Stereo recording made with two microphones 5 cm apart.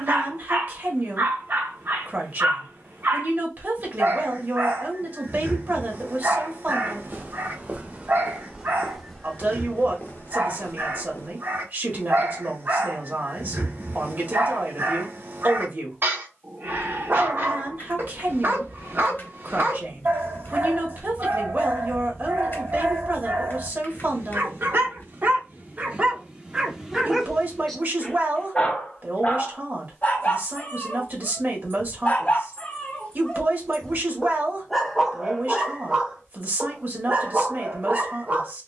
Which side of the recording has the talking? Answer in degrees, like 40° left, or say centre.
40° right.